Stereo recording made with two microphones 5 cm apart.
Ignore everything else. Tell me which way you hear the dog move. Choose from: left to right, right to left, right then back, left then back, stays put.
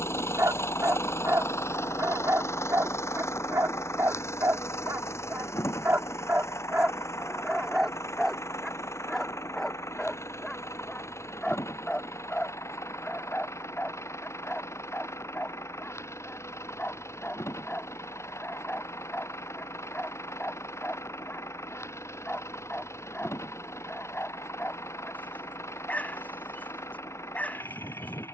right to left.